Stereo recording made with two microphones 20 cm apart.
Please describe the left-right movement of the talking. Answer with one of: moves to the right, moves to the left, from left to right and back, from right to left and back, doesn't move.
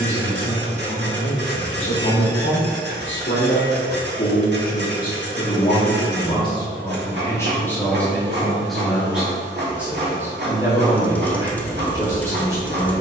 moves to the right.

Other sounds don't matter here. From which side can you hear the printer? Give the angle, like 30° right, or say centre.
60° right.